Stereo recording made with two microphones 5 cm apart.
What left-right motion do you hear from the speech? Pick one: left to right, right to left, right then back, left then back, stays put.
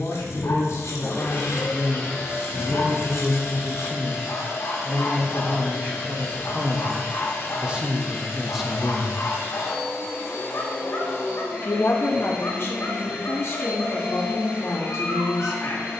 right then back.